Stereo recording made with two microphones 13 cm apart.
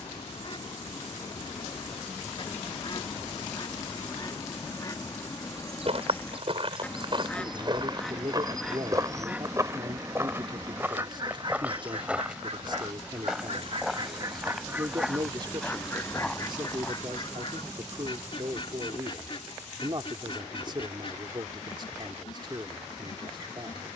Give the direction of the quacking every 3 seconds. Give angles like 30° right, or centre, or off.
40° left, 30° left, 10° left, 30° right, 40° right, 30° left, 40° left, 40° left.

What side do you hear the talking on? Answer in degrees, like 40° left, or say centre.
40° right.